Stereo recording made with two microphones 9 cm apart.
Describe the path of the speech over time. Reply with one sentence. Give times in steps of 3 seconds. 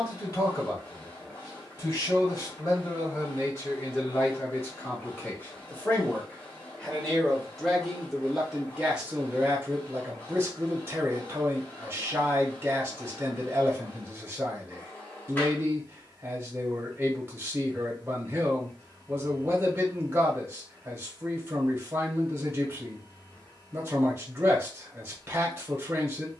You can hear the speech on the left from 0 s, in the centre from 6 s and on the right from 9 s.